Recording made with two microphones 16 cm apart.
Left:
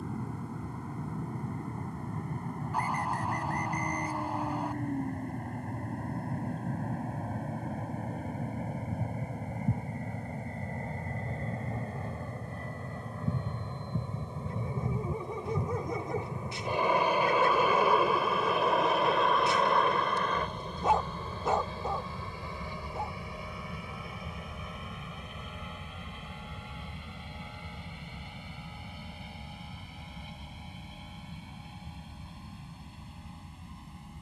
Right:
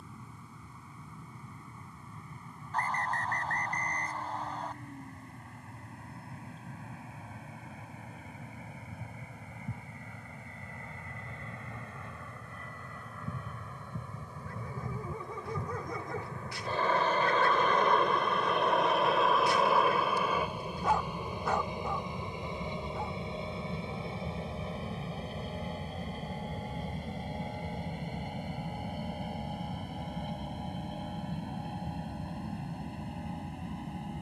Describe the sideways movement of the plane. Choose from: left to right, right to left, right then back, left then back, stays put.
left to right.